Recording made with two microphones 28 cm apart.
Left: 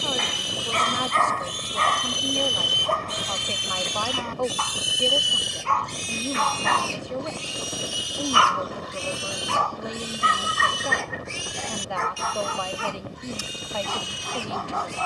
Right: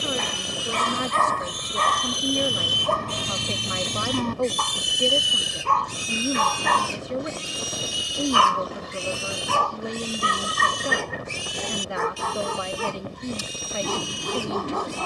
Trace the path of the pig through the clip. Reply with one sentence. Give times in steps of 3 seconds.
You can hear the pig on the left from 0 s, in the centre from 3 s and on the right from 6 s.